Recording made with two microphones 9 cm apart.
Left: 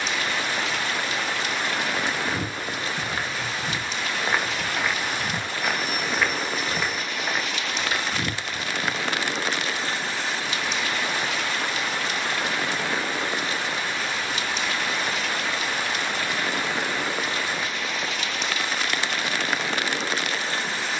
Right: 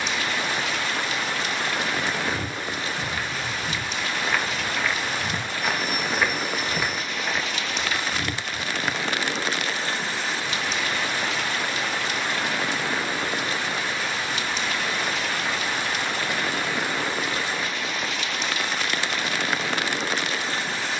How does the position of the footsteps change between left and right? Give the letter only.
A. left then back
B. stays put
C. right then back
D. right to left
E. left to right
C.